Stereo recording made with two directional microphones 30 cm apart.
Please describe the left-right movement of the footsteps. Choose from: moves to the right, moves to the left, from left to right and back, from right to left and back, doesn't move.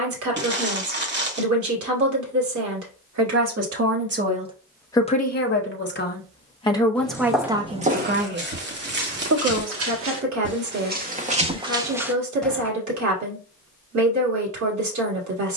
from left to right and back.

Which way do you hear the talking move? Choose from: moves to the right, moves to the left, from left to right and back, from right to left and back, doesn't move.
from right to left and back.